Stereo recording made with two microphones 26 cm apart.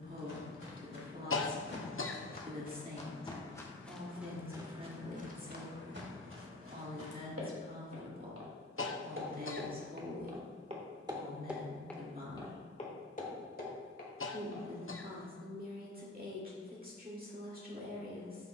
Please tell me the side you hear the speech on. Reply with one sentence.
In this clip you hear the speech on the right.